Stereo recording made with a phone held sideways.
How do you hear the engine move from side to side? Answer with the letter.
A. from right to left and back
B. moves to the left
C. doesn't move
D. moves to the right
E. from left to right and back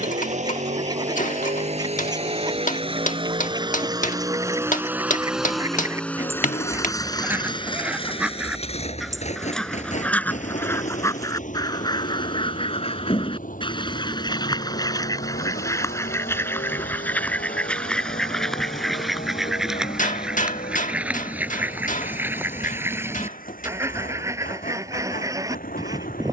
B.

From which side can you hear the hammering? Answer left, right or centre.
left.